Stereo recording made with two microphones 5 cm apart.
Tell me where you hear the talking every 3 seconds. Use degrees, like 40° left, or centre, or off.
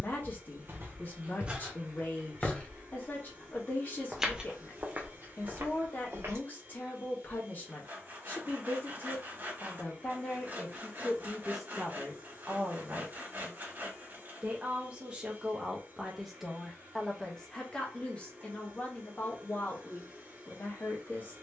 40° left, 40° left, 40° left, 20° left, 30° right, centre, 30° left.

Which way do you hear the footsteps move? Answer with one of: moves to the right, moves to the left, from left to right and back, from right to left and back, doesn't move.
from right to left and back.